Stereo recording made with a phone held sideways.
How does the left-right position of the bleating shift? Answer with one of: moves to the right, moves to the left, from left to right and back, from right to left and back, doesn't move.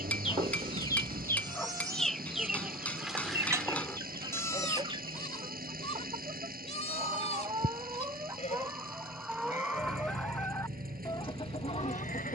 moves to the left.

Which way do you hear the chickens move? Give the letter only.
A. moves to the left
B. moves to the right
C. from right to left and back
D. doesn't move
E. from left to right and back
E.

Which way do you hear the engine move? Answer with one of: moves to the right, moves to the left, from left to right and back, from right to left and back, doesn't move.
doesn't move.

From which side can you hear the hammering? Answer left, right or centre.
centre.